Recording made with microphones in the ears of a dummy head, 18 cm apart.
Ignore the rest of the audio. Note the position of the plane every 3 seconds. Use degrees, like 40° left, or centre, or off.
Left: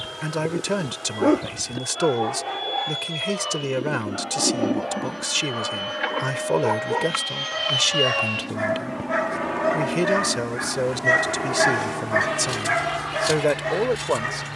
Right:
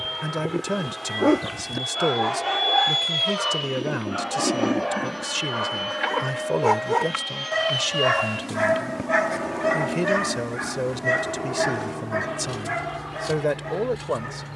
40° right, 20° right, 10° left, 40° left, 50° left.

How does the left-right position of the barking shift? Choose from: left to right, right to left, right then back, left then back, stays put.
right then back.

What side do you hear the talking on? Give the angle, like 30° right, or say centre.
20° left.